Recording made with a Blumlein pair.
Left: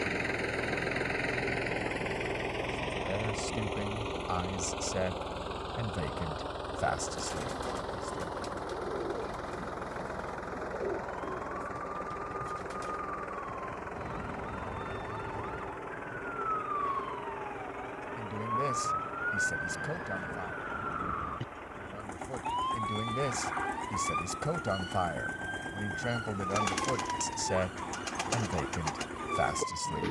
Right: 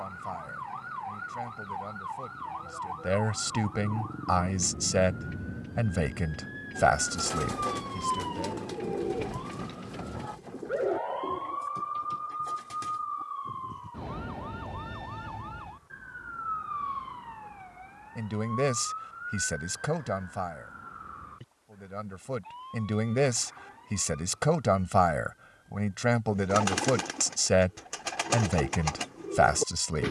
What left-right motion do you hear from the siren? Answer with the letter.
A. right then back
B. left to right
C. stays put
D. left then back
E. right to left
E.